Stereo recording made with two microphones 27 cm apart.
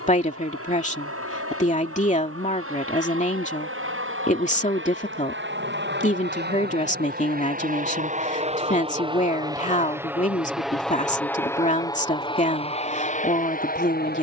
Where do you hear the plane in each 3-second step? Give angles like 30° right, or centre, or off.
60° right, 50° right, 30° right, centre, 30° left.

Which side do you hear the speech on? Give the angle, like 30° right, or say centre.
30° left.